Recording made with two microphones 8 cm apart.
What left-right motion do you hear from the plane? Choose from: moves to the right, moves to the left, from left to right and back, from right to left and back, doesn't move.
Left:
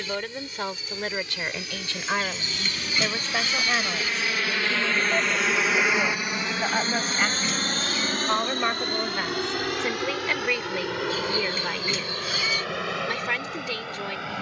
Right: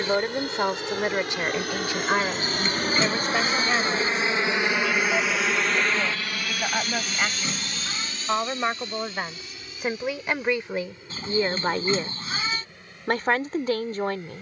moves to the left.